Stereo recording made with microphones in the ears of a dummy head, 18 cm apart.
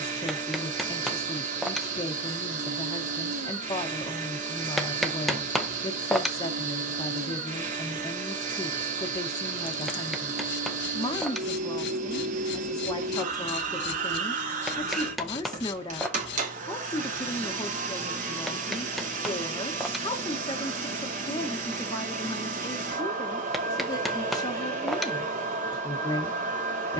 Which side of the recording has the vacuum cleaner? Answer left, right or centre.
right.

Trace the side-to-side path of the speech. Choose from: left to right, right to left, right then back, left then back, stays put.
stays put.